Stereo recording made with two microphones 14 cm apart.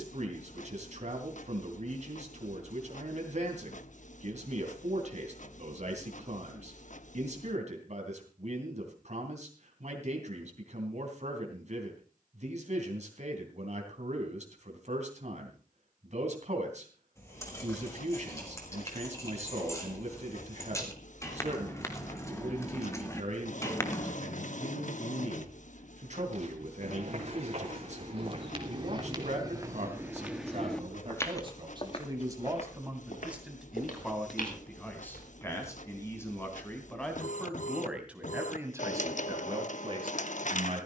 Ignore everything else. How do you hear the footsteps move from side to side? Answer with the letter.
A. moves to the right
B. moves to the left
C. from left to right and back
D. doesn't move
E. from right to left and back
B.